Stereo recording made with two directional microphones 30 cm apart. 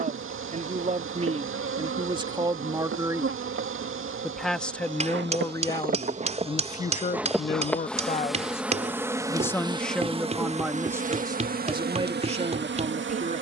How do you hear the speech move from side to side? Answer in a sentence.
In this clip you hear the speech move from right to left and back again.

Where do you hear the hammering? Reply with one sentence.
You can hear the hammering on the right.